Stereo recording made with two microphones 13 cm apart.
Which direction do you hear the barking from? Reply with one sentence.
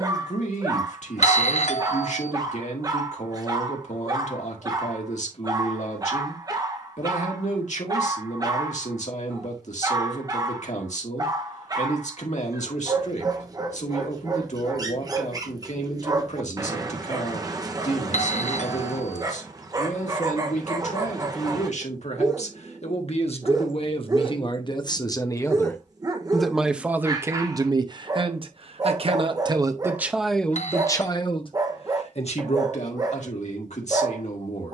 In this clip you hear the barking on the right.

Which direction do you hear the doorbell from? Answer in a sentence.
You can hear the doorbell on the left.